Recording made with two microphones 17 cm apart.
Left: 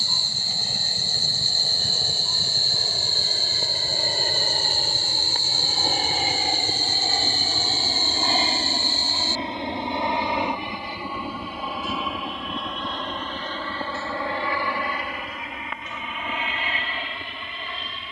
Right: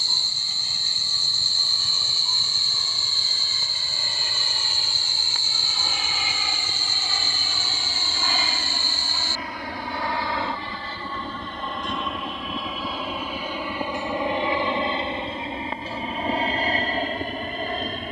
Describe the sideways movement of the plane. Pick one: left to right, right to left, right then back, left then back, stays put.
left to right.